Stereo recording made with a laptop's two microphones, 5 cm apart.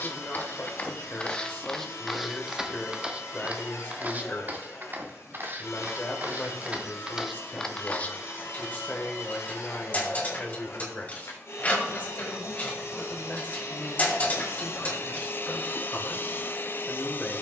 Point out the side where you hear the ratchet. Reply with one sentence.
In this clip you hear the ratchet on the left.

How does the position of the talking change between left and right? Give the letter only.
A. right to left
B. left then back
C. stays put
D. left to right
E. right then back
C.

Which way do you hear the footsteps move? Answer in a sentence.
In this clip you hear the footsteps go right and come back.